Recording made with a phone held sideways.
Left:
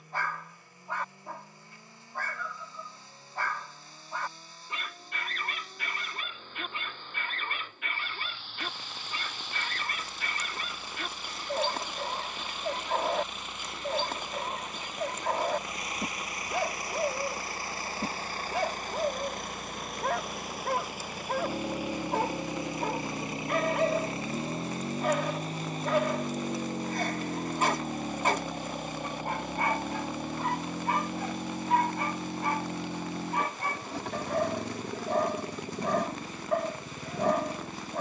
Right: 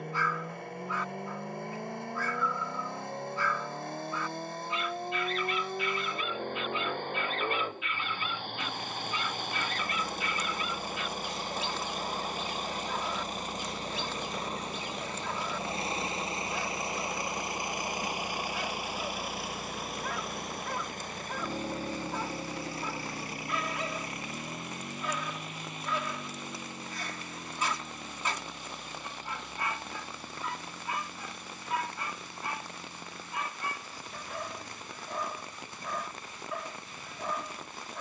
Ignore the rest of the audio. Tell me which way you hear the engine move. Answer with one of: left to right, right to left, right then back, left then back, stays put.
right to left.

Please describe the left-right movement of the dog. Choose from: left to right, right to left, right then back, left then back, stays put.
stays put.